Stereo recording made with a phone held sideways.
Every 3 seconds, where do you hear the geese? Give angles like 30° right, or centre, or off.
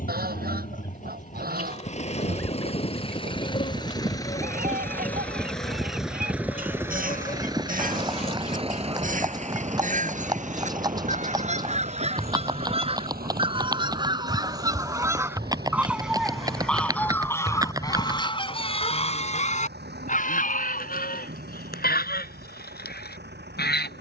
60° right, 60° right, 50° right, 50° right, 30° right, centre, 40° left, 70° left.